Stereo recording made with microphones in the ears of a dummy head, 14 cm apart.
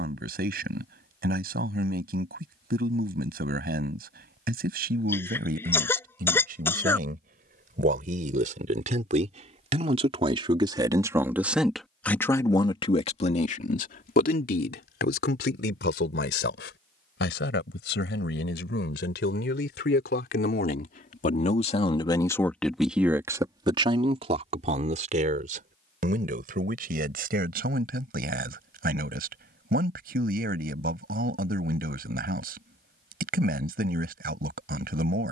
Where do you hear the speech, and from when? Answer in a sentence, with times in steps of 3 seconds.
In this clip you hear the speech on the right from 0 s, on the left from 12 s, in the centre from 21 s and on the right from 24 s.